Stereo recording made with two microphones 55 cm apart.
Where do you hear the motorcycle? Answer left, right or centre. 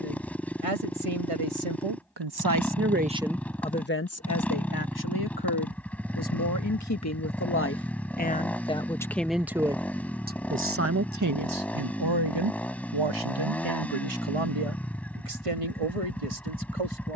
centre.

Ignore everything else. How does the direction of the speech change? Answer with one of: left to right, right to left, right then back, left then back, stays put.
left then back.